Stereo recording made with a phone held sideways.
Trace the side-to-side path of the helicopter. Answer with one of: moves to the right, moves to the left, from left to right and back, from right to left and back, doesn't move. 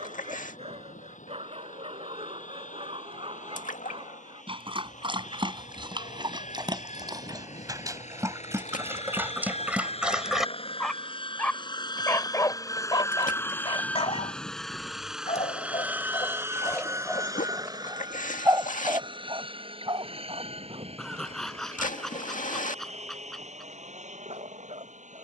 moves to the right.